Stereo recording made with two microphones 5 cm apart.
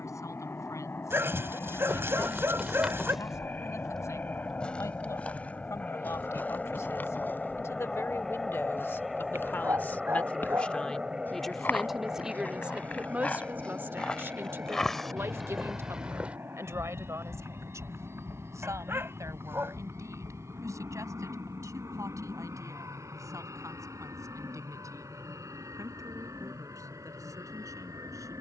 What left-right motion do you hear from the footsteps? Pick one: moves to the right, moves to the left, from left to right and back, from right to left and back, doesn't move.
from right to left and back.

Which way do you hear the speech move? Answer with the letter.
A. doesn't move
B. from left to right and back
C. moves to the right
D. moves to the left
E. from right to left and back
C.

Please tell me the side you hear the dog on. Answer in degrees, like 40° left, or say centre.
40° right.